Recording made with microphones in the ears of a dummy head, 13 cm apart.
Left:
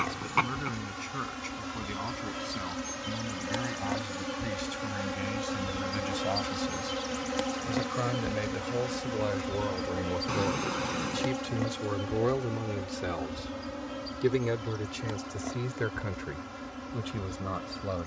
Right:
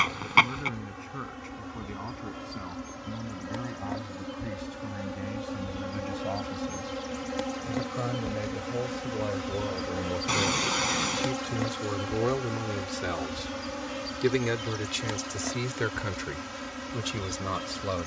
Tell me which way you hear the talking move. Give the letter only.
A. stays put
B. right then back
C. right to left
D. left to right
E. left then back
D.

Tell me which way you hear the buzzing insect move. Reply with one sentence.
You can hear the buzzing insect move to the right.